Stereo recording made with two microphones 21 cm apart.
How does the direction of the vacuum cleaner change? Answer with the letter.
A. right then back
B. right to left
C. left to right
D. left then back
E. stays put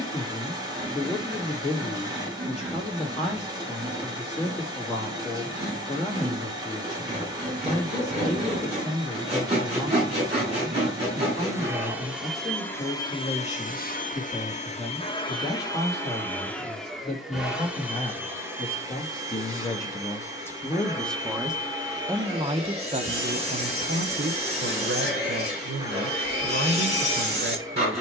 D.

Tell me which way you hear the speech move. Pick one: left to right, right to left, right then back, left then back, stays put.
left to right.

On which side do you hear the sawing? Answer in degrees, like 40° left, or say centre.
30° right.